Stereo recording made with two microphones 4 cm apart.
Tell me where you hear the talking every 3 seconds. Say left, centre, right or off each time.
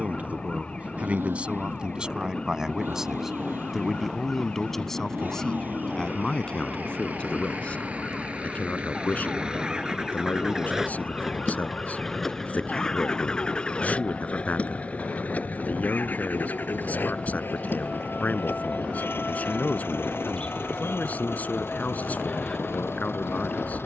right, centre, left, left, left, left, left, left.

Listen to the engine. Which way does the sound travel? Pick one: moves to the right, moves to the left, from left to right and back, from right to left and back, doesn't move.
moves to the left.